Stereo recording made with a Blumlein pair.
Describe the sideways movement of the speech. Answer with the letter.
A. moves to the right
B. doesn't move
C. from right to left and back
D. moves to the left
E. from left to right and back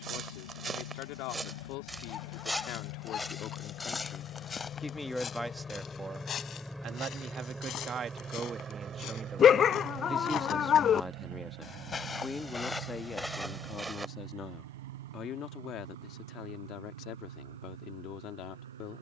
E.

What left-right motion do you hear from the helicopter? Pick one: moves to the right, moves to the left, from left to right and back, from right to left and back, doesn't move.
moves to the right.